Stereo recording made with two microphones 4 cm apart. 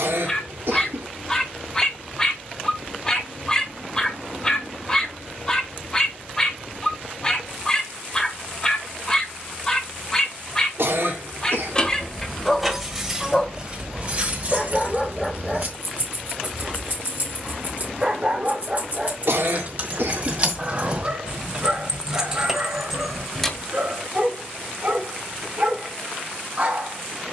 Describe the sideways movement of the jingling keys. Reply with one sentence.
You can hear the jingling keys go right and come back.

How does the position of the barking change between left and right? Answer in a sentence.
In this clip you hear the barking move from left to right.